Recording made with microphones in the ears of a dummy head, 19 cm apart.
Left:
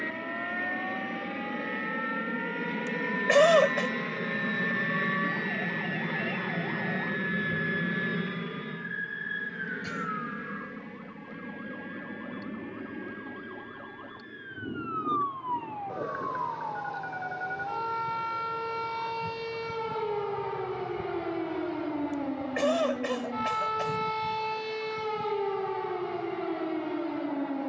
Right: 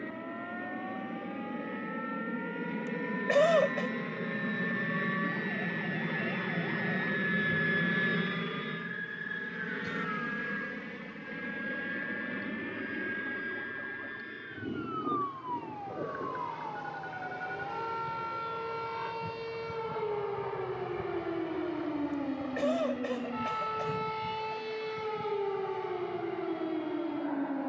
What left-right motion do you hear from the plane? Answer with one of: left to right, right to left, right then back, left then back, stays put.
left to right.